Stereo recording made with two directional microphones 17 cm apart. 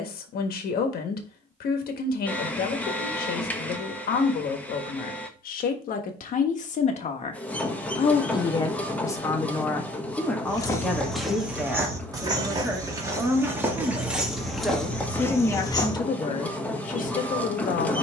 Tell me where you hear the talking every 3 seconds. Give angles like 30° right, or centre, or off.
60° left, 60° left, 40° left, 10° left, 10° right, 40° left.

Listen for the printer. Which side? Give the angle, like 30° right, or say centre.
10° left.